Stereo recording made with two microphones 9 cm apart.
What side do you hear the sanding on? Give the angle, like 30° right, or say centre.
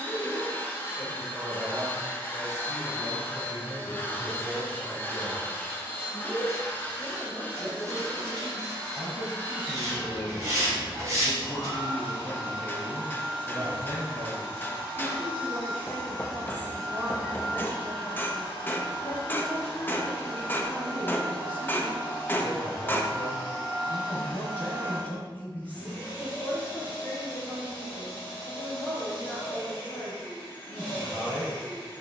40° right.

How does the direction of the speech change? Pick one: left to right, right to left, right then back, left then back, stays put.
right to left.